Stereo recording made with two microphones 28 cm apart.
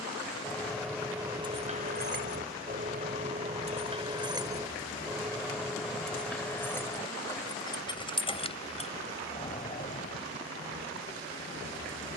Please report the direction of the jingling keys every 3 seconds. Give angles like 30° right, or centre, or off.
20° right, 10° right, 10° left, 30° left.